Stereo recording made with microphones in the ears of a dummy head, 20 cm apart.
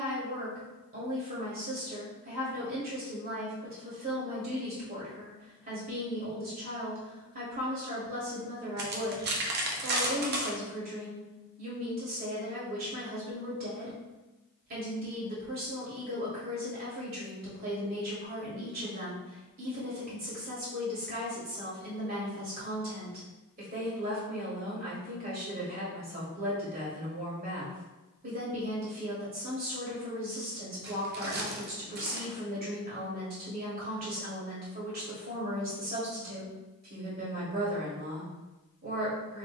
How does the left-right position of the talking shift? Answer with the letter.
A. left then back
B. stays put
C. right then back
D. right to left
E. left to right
B.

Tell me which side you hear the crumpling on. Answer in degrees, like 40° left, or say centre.
50° right.